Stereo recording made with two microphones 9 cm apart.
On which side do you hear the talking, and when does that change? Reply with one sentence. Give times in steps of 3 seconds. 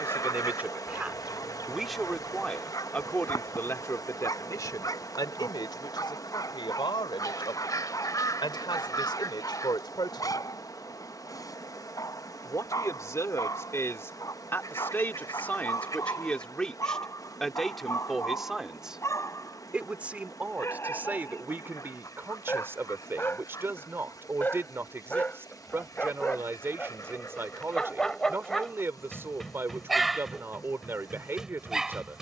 In this clip you hear the talking in the centre from 0 s, on the left from 3 s, in the centre from 15 s and on the right from 21 s.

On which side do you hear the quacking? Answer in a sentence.
You can hear the quacking on the left.